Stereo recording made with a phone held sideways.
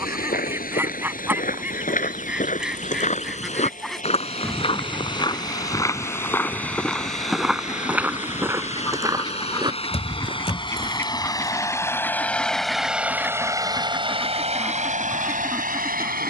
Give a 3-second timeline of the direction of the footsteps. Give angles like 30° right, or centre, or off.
60° left, 40° left, centre, 30° right, off, off.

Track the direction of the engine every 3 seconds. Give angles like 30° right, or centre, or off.
60° left, 60° left, 50° left, 30° left, 20° right, 60° right.